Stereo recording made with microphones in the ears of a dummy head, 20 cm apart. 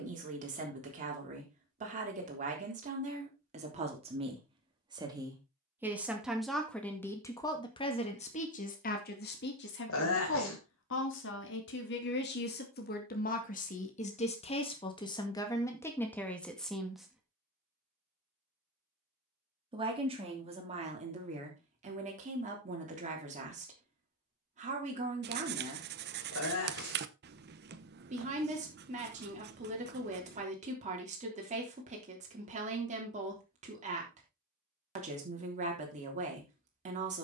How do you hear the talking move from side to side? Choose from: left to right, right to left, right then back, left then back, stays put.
left then back.